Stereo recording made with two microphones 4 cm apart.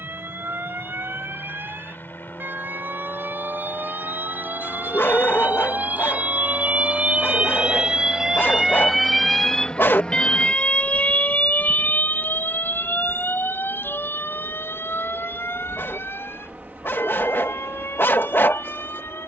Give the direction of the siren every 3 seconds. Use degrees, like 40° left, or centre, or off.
70° right, 60° right, 30° right, 20° left, 60° left, 70° left, 80° left.